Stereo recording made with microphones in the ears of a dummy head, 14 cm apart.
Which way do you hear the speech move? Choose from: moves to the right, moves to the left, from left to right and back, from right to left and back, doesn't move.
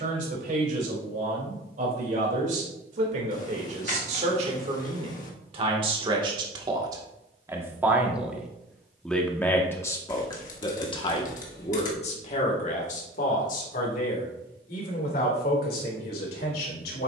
moves to the left.